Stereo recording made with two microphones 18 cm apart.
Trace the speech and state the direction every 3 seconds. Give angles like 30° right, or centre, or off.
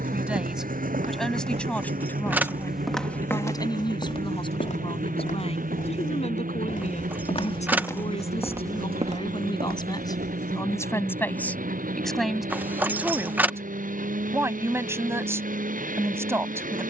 centre, 30° left, 40° left, 20° left, 10° right, 10° right.